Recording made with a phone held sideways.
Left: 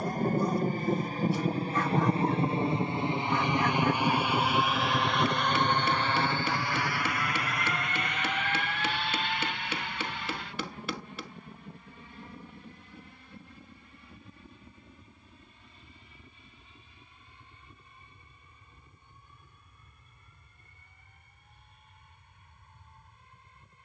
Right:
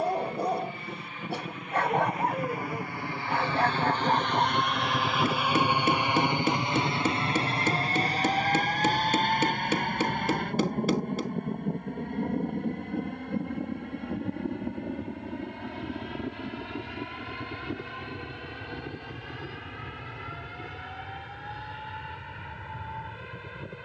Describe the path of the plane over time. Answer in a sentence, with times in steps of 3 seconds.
You can hear the plane on the left from 0 s, in the centre from 3 s and on the right from 6 s.